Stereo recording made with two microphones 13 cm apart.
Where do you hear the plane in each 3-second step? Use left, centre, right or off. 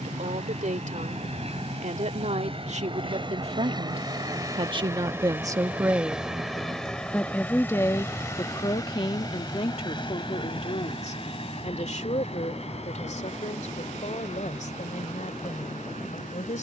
right, right, centre, left, left, left.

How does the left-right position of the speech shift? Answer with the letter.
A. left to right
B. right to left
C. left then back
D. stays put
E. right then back
B.